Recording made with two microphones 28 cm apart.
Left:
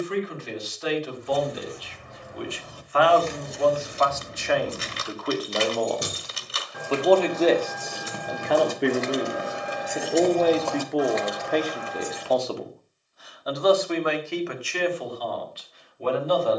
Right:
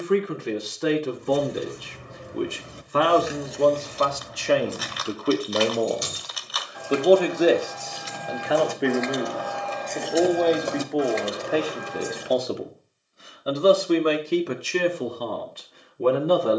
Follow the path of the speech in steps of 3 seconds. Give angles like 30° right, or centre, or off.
60° right, 40° right, 10° right, centre, 30° right, 60° right.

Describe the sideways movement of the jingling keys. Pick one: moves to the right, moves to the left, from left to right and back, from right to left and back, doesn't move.
from right to left and back.